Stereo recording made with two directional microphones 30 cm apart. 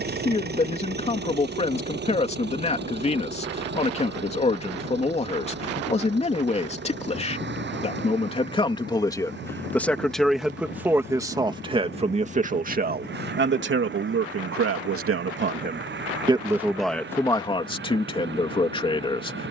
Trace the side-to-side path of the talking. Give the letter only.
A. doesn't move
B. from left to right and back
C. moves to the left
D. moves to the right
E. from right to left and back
B.